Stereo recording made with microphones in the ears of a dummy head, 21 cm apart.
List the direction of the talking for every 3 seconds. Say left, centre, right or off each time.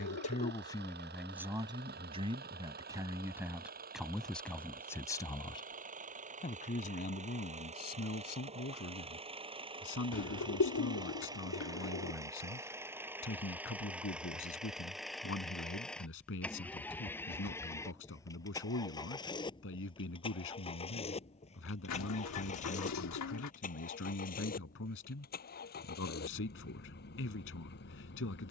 centre, centre, left, left, left, left, left, left, left, left.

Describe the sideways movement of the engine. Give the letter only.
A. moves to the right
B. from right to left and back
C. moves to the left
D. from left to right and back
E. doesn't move
C.